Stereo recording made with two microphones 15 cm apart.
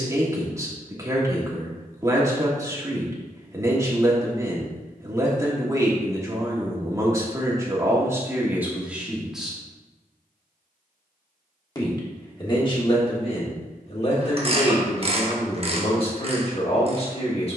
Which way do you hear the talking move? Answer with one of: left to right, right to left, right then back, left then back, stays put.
right to left.